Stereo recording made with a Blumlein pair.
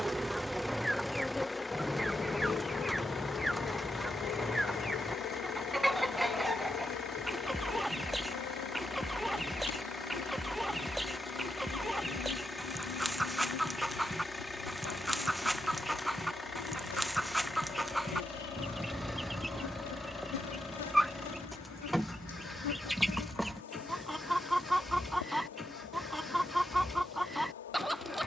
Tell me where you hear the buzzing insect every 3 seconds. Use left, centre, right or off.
centre, left, left, left, left, left, left, left, left, left.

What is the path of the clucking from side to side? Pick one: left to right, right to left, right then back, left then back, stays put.
stays put.